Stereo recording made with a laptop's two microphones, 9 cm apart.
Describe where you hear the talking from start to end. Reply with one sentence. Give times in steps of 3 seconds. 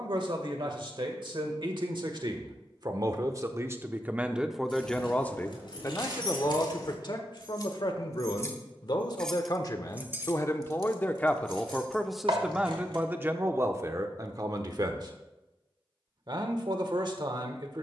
In this clip you hear the talking on the right from 0 s, in the centre from 3 s, on the left from 6 s and on the right from 12 s.